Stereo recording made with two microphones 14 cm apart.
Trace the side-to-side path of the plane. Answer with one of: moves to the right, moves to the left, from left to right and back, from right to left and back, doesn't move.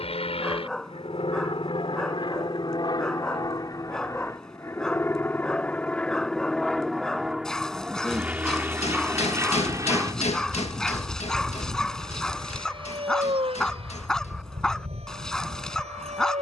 moves to the right.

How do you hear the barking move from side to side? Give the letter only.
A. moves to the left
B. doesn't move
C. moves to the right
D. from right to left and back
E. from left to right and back
B.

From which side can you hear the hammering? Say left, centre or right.
left.